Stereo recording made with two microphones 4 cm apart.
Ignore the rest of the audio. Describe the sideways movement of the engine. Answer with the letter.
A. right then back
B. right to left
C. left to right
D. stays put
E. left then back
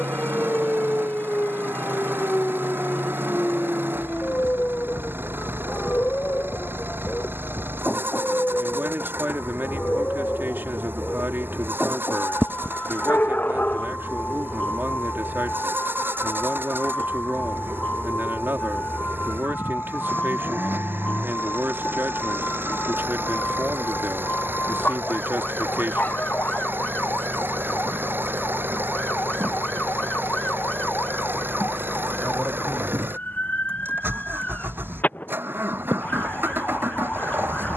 D.